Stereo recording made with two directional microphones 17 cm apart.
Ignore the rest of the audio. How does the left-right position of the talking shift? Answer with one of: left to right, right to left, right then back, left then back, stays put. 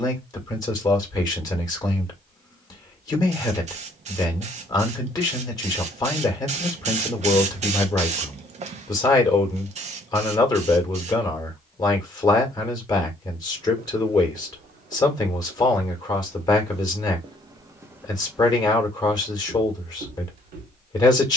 stays put.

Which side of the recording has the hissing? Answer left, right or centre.
right.